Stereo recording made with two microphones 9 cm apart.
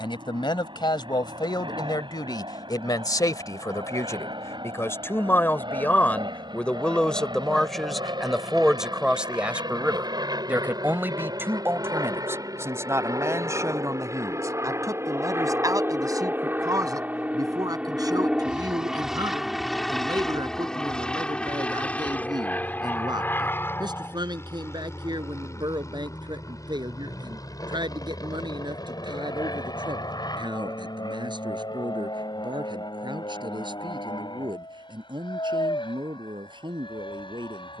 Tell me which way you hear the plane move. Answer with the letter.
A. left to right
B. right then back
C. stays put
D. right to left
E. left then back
D.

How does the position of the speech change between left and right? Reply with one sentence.
You can hear the speech move to the right.